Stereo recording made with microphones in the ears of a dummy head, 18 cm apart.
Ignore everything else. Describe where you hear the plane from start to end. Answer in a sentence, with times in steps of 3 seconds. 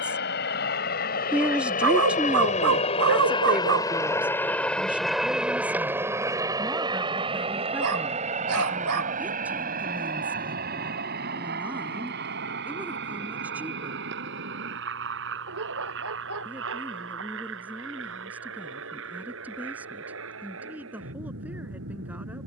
You can hear the plane on the left from 0 s, in the centre from 3 s and on the right from 6 s.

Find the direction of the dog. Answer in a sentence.
You can hear the dog on the right.